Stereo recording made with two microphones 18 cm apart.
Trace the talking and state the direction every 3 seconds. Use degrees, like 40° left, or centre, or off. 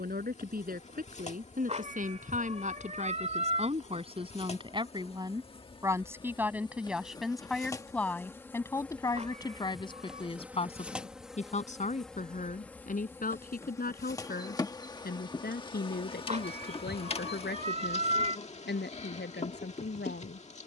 50° right, 30° right, centre, 30° left, 50° left, 60° left, 70° left.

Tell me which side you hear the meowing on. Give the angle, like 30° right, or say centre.
40° right.